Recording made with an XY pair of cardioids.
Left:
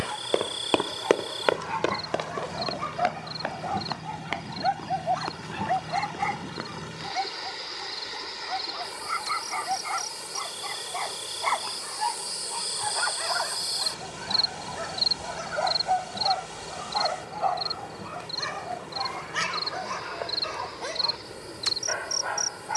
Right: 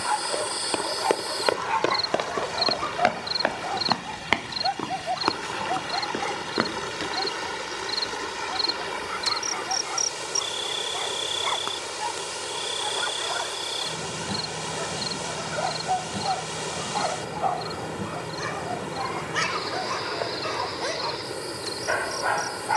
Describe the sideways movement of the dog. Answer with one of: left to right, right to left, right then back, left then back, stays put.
left then back.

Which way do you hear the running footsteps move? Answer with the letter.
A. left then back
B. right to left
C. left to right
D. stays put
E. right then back
C.